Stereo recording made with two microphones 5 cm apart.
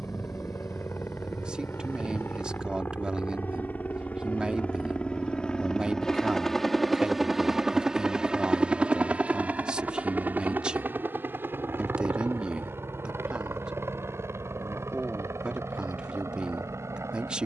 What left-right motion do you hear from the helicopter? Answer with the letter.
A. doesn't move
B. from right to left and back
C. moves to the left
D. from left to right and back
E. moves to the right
E.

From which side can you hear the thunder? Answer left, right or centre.
centre.